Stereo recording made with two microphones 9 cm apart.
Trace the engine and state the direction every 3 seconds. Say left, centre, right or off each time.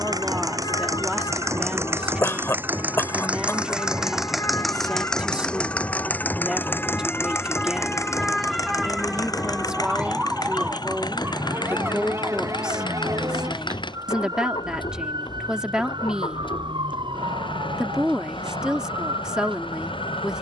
right, centre, left, left, left, left, left.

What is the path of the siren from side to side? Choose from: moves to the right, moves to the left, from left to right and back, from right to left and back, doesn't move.
moves to the right.